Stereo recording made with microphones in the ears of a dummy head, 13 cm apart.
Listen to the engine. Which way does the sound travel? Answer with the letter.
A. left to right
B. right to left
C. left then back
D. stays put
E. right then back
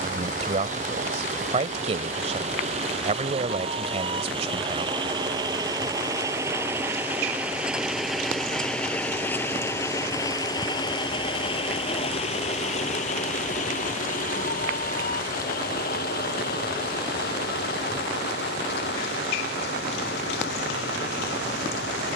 B.